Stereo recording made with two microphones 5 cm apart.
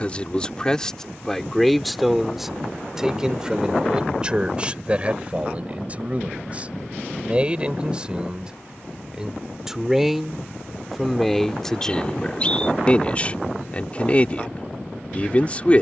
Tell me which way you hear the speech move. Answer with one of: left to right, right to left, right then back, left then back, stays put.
right then back.